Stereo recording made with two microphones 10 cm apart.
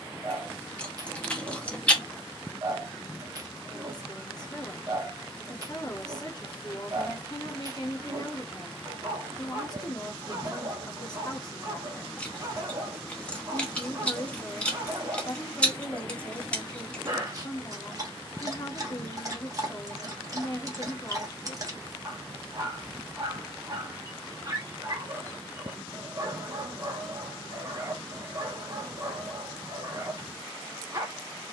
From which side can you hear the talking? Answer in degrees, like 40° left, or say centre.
40° left.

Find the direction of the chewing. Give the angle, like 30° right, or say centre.
10° left.